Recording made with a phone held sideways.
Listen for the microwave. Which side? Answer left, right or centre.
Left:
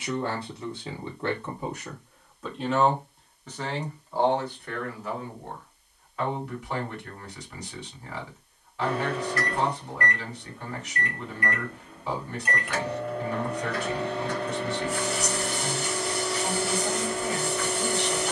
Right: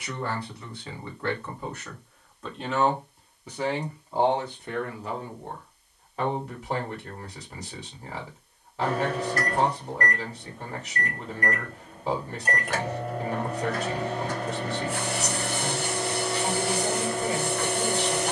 right.